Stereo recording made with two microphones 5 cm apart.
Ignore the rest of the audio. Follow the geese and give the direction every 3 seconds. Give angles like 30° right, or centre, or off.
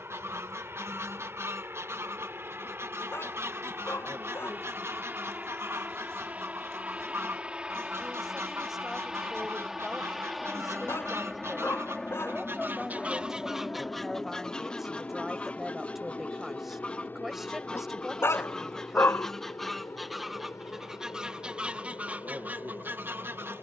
60° right, 60° right, 60° right, 60° right, 10° right, 20° left, centre, 30° right.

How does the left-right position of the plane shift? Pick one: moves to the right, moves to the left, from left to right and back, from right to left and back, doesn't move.
moves to the left.